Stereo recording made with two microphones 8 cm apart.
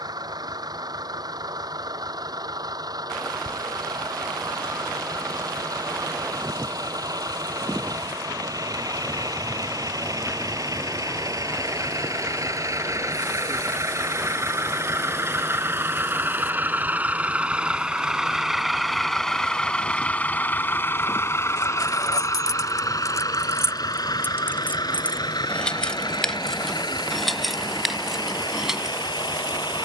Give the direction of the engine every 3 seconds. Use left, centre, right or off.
right, right, right, right, right, right, centre, left, left, left.